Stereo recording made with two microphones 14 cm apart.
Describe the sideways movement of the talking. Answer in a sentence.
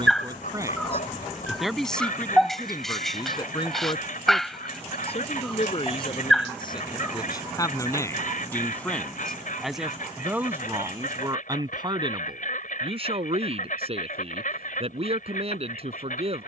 You can hear the talking go left and come back.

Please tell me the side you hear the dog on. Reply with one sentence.
In this clip you hear the dog in the centre.